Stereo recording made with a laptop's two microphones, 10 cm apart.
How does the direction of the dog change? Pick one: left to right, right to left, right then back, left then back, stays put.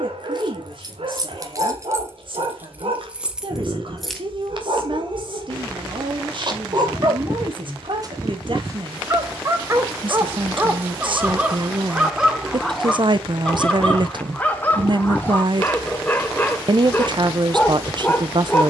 right to left.